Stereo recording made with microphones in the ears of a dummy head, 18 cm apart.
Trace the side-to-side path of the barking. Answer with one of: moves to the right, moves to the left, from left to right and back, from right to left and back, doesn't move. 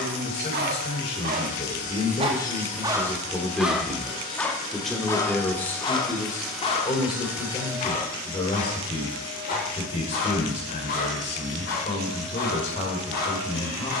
moves to the left.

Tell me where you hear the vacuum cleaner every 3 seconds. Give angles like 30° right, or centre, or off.
50° left, 20° left, 10° right, 30° right, 30° right.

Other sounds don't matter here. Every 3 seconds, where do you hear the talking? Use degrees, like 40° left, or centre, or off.
30° left, 10° left, 30° left, 30° left, 30° left.